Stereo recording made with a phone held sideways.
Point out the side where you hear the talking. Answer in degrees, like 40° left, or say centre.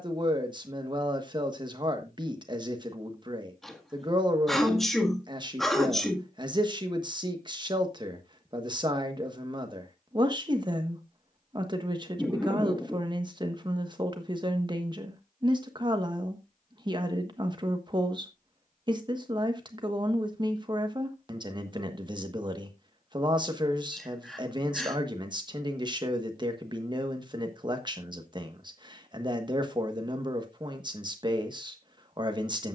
30° right.